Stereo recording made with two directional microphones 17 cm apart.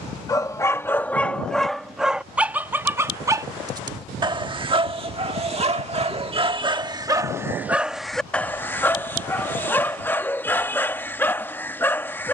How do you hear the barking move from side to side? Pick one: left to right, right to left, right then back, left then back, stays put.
right then back.